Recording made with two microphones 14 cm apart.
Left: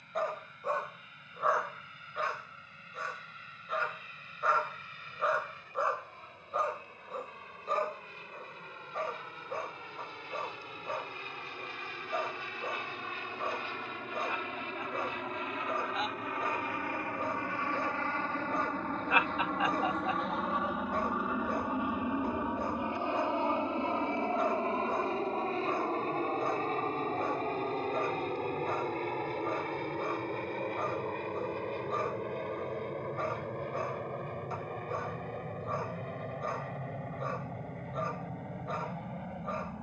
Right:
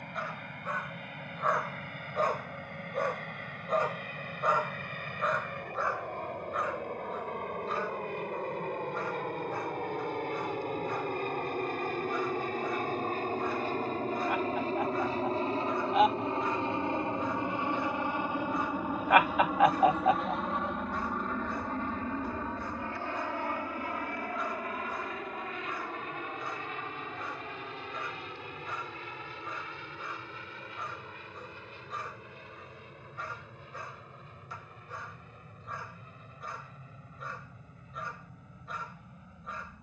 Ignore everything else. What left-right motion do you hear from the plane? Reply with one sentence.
You can hear the plane travel towards the left.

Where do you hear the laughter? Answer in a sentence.
In this clip you hear the laughter on the right.